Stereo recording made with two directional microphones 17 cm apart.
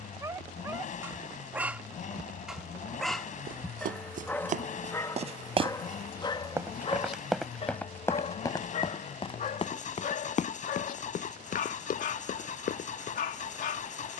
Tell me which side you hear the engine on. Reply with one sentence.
In this clip you hear the engine on the left.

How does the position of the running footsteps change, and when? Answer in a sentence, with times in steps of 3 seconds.
You can hear the running footsteps not at all from 0 s, on the right from 3 s, in the centre from 6 s and on the left from 9 s.